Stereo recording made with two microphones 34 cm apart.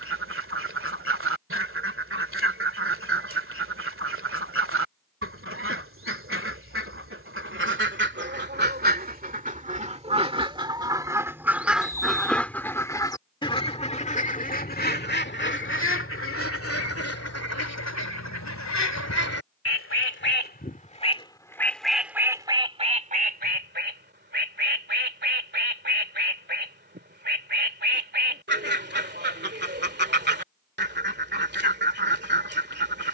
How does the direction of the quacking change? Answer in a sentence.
In this clip you hear the quacking go left and come back.